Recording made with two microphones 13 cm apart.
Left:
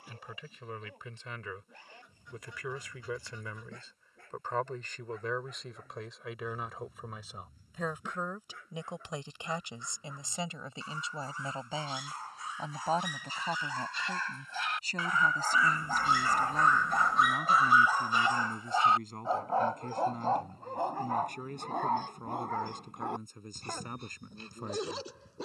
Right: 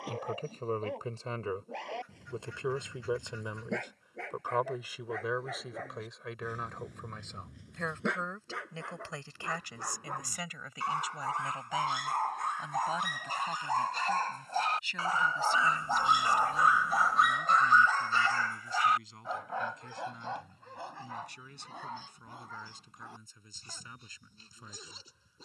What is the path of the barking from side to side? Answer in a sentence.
You can hear the barking travel towards the left.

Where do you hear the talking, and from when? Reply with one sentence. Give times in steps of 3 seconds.
In this clip you hear the talking on the right from 0 s, in the centre from 3 s and on the left from 9 s.